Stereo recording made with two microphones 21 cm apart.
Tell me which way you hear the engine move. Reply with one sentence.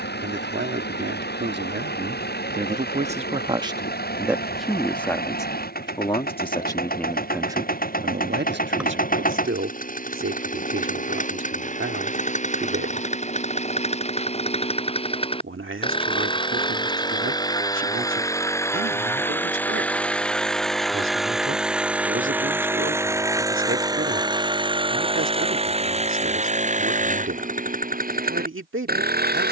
You can hear the engine move to the right.